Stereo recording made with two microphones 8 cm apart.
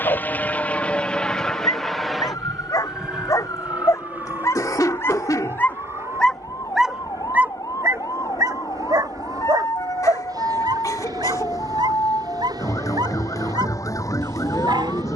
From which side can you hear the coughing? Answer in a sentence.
You can hear the coughing on the left.